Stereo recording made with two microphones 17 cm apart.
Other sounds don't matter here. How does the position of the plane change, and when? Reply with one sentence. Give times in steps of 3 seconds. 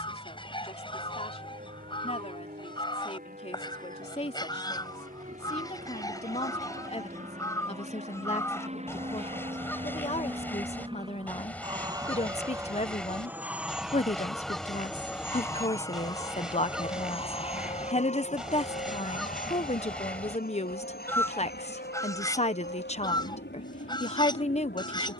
You can hear the plane on the right from 0 s, in the centre from 12 s and on the left from 15 s.